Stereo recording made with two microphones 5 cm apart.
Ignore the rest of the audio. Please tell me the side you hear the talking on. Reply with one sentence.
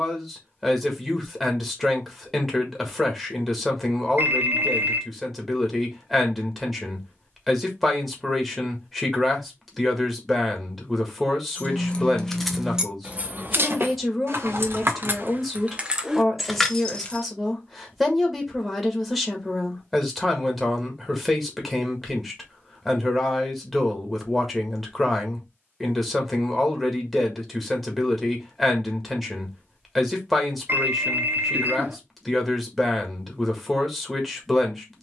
You can hear the talking in the centre.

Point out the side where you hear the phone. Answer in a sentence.
In this clip you hear the phone on the right.